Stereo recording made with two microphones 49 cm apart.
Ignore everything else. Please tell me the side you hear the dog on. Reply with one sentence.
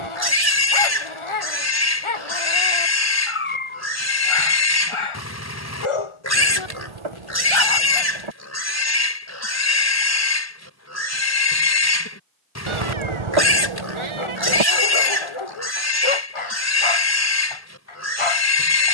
In this clip you hear the dog on the left.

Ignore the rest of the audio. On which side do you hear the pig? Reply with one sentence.
In this clip you hear the pig on the left.